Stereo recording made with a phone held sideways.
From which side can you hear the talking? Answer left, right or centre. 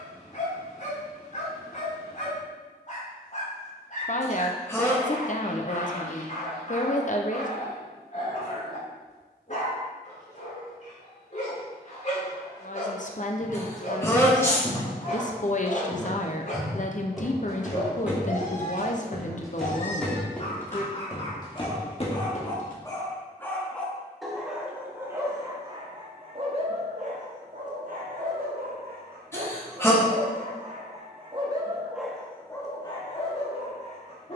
left.